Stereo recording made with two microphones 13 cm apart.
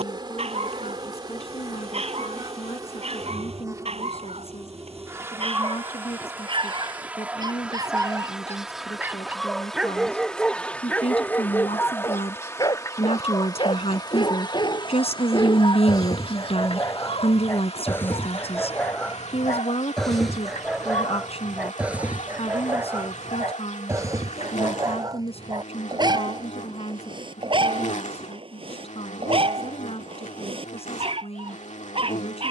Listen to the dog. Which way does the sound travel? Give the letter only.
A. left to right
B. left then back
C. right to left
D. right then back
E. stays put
B.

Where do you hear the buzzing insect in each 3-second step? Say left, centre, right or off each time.
right, right, centre, centre, left, left, left, left, left, left, left.